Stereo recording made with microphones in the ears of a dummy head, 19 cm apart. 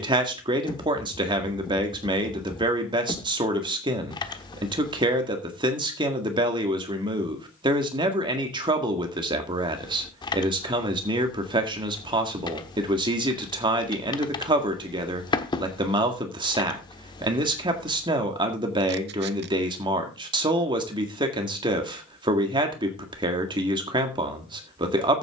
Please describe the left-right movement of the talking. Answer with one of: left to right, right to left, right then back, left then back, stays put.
stays put.